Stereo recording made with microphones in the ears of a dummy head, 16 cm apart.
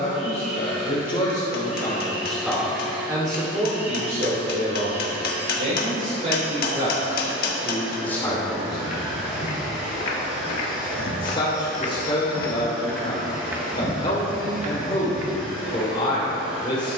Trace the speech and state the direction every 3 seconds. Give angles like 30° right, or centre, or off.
20° left, 40° right, 10° right, 30° left, 30° left, 30° left.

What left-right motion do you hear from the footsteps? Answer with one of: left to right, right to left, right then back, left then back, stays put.
left to right.